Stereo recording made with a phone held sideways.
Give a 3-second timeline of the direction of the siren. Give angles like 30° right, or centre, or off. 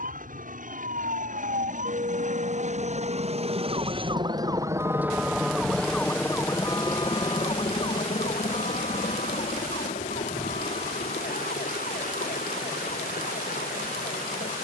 60° right, 20° right, 30° left, 60° left, 70° left.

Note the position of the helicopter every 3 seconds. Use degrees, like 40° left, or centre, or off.
60° right, 30° right, 40° left, 60° left, 70° left.